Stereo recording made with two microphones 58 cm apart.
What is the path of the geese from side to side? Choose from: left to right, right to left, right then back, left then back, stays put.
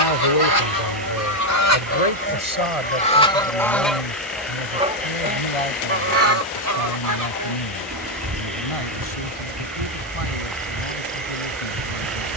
left to right.